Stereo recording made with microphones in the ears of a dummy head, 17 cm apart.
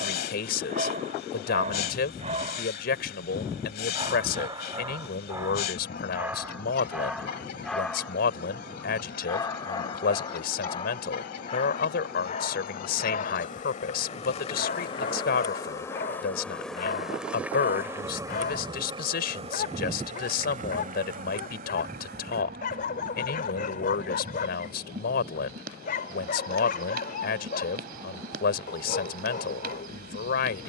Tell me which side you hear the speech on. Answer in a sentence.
You can hear the speech on the left.